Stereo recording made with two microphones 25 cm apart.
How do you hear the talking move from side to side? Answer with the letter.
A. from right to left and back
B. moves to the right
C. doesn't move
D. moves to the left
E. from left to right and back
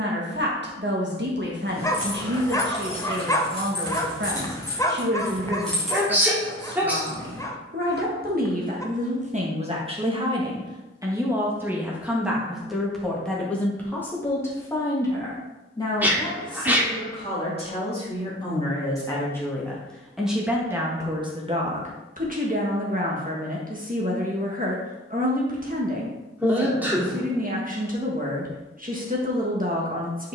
A.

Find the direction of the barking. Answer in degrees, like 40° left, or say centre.
10° left.